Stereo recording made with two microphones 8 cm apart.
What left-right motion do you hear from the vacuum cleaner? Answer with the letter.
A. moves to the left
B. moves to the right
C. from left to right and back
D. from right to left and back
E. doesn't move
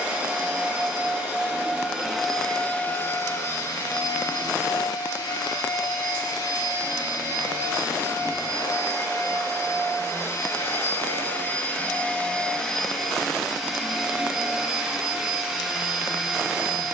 D.